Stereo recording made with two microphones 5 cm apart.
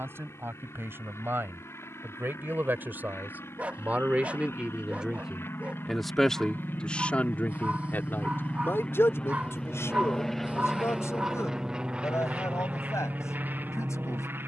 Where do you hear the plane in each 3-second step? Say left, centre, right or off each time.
left, left, left, centre, right.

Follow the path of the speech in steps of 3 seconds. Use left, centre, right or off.
right, right, left, left, left.